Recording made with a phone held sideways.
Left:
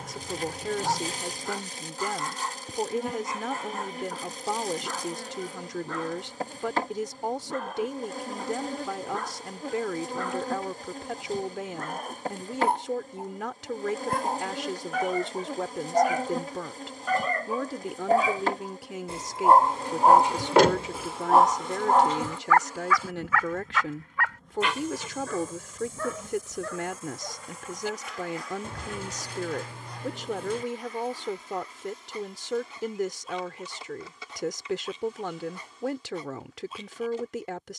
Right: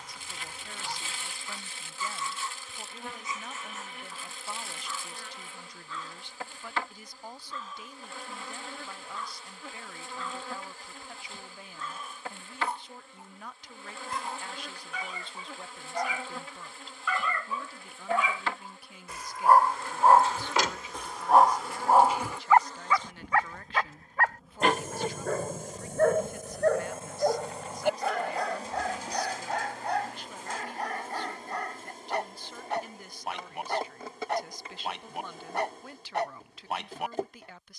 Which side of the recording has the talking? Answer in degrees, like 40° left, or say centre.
90° left.